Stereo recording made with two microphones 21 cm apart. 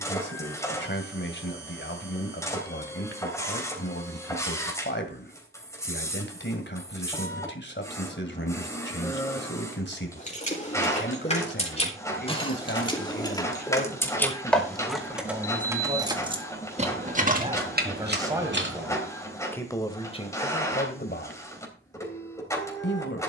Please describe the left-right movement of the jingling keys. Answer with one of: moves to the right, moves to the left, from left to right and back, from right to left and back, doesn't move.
moves to the right.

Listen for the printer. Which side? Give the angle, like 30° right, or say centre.
10° left.